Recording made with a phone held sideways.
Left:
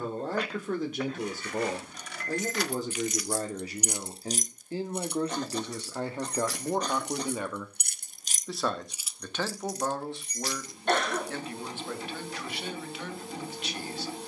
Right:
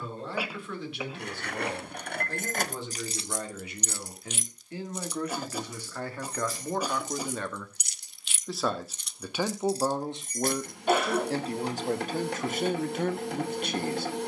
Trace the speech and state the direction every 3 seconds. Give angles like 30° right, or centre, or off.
40° left, 30° left, 10° left, 20° right, 50° right.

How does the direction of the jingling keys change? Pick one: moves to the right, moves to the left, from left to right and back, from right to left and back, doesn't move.
from right to left and back.